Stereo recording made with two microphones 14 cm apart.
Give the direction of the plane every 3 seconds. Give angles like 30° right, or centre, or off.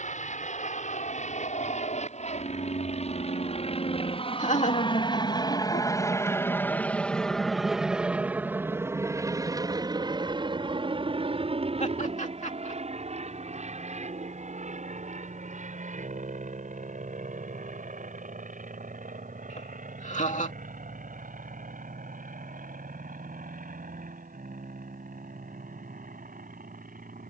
60° left, 40° left, centre, 30° right, 50° right, 60° right, 60° right, 70° right, 70° right.